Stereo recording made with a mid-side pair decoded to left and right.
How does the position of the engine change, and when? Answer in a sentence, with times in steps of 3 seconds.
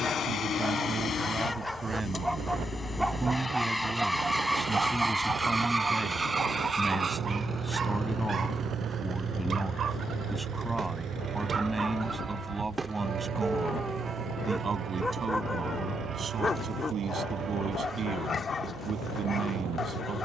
You can hear the engine on the left from 0 s, in the centre from 3 s and on the right from 6 s.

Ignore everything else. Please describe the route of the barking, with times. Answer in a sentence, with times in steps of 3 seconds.
You can hear the barking in the centre from 0 s, on the right from 6 s, in the centre from 12 s and on the left from 15 s.